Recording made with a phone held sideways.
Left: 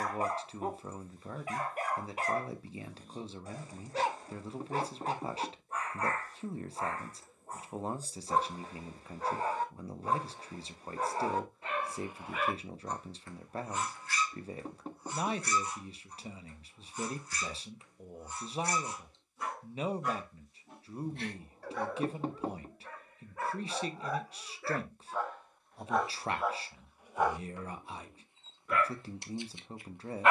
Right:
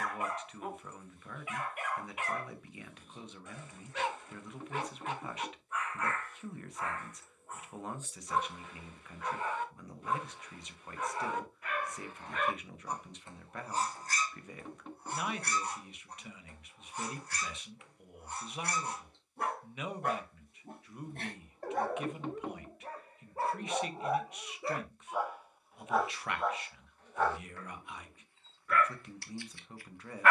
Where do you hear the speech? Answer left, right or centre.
left.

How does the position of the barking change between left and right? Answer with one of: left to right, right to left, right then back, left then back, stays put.
right then back.